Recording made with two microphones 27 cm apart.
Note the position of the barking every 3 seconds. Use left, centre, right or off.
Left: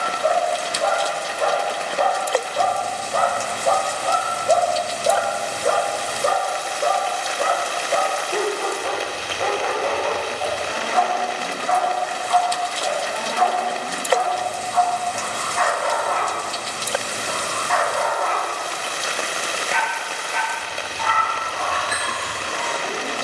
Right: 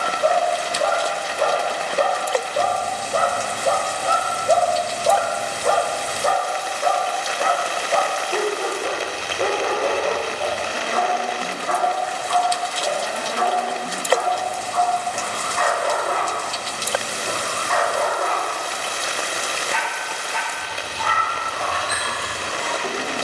right, centre, centre, right, right, right, right, right.